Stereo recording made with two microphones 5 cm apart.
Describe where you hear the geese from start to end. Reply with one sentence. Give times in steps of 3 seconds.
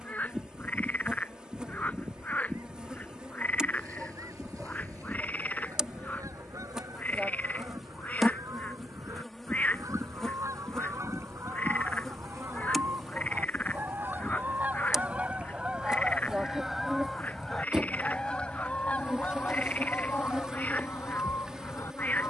You can hear the geese on the right from 0 s, in the centre from 15 s and on the left from 18 s.